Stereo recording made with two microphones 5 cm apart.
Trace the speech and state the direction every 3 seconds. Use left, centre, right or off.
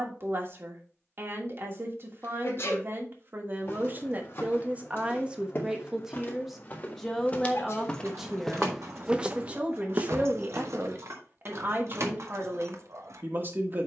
right, right, centre, right, right.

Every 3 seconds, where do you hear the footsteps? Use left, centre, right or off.
off, left, left, right, off.